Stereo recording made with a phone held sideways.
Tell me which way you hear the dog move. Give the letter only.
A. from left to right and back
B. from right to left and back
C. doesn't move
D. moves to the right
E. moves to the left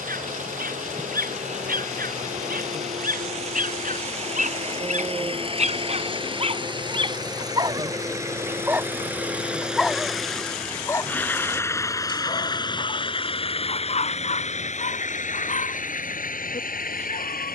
E.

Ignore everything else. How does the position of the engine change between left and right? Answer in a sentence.
In this clip you hear the engine travel towards the left.